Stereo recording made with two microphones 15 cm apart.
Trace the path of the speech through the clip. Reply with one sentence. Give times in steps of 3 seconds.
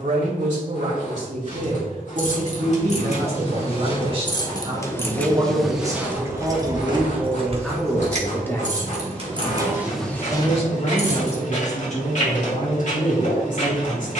In this clip you hear the speech on the right from 0 s, in the centre from 6 s and on the left from 9 s.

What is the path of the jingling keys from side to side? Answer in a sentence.
In this clip you hear the jingling keys move from left to right and back again.